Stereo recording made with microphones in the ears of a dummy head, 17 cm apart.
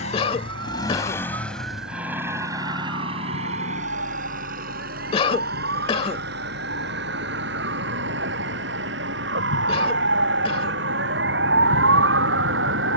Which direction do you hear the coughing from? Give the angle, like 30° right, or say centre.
30° left.